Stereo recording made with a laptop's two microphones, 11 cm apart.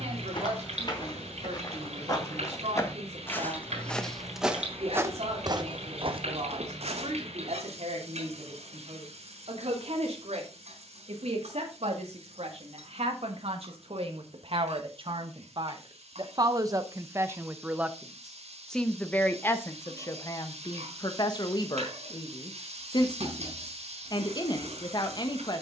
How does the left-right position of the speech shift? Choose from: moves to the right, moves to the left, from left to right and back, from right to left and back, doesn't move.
moves to the left.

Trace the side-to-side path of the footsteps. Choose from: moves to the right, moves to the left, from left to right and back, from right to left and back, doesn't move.
moves to the right.